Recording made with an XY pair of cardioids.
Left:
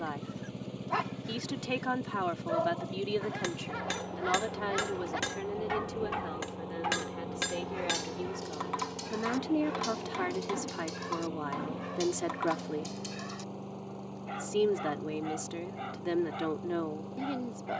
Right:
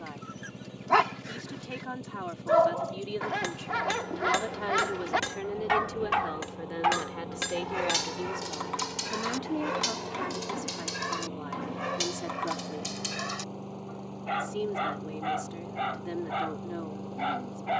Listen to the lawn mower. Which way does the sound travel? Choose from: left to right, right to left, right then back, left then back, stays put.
left to right.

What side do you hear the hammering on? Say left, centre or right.
centre.